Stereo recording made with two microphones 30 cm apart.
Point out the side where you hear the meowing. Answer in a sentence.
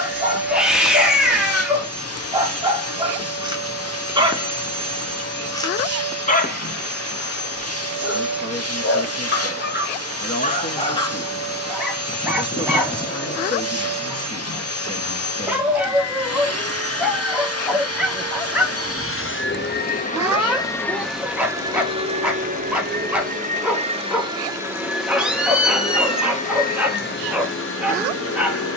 You can hear the meowing in the centre.